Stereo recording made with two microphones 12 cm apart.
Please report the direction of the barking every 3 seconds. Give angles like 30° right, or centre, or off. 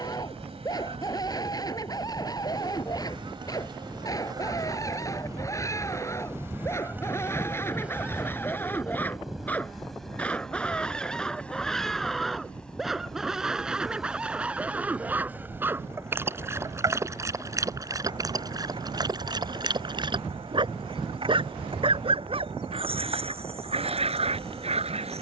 30° left, 30° left, 20° left, 10° left, 10° right, 20° right, 40° right, 50° right, 60° right.